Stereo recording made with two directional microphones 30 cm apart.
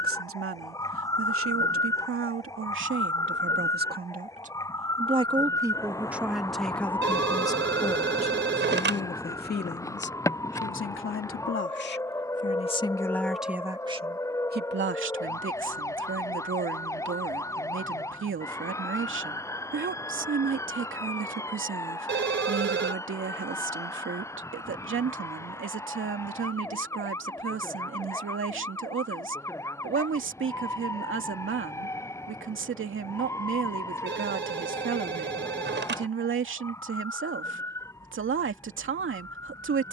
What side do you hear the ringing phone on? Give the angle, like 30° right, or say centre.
40° right.